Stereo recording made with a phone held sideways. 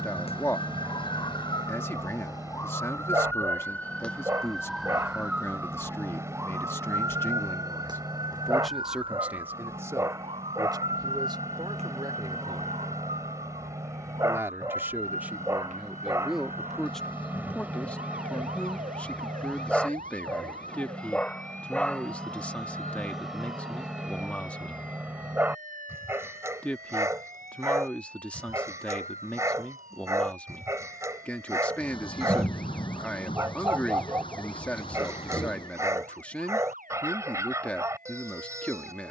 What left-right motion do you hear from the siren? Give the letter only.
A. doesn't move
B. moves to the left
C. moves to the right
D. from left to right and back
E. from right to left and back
C.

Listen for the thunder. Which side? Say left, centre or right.
left.